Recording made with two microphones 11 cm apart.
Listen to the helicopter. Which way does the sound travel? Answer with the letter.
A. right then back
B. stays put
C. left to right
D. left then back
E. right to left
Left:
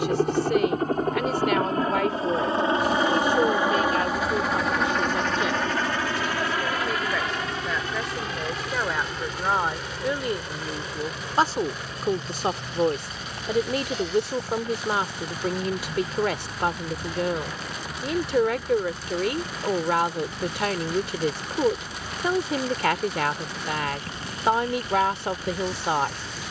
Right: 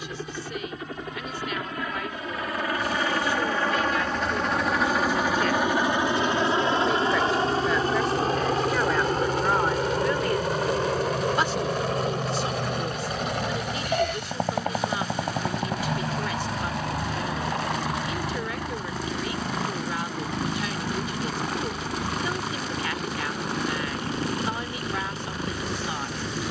C.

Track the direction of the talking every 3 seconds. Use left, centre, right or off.
left, left, centre, left, left, left, left, left, left.